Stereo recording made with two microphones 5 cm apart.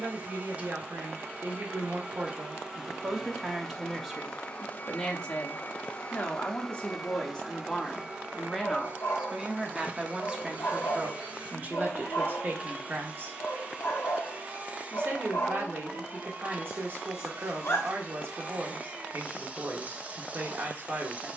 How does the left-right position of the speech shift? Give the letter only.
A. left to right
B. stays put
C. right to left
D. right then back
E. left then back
E.